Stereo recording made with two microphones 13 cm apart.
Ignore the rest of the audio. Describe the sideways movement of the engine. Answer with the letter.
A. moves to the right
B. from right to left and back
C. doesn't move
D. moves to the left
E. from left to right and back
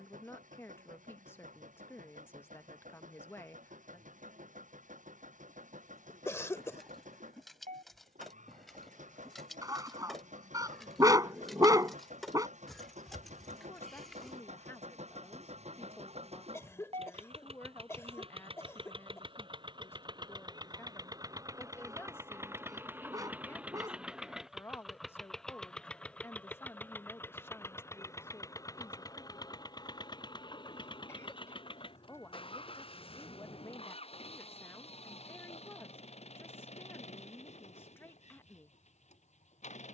D.